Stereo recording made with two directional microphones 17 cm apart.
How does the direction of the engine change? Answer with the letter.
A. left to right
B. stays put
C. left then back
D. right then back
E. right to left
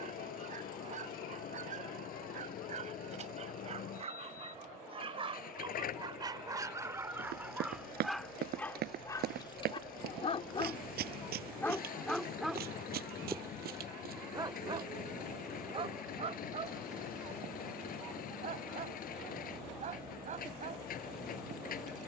B.